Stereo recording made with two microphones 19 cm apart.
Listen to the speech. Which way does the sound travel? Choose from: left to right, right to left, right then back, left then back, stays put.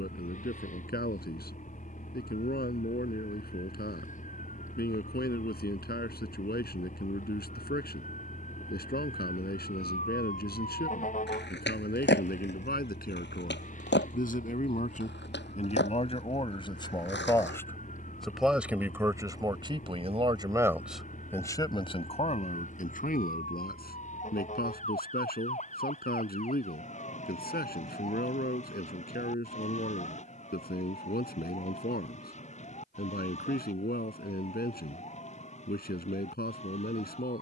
right then back.